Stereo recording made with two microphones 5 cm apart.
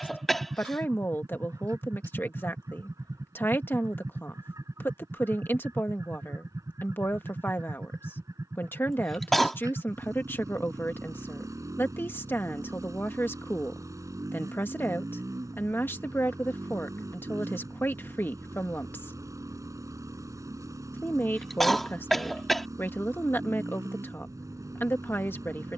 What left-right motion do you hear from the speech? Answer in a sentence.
In this clip you hear the speech stay in one place.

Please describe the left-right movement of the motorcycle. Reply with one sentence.
In this clip you hear the motorcycle stay in one place.